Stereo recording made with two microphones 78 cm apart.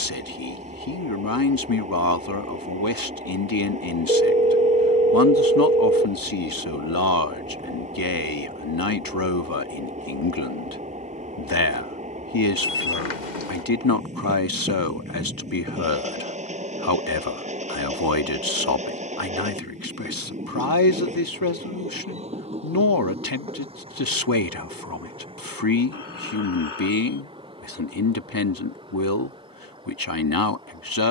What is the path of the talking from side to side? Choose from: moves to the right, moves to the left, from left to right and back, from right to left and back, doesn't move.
doesn't move.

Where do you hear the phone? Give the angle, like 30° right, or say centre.
70° left.